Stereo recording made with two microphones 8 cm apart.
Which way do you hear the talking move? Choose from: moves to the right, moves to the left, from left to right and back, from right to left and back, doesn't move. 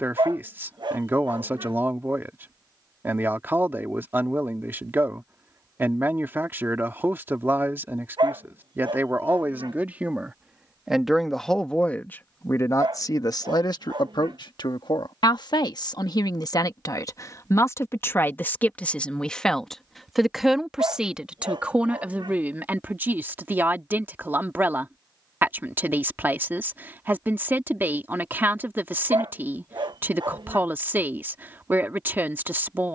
from right to left and back.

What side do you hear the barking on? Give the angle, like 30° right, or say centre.
70° right.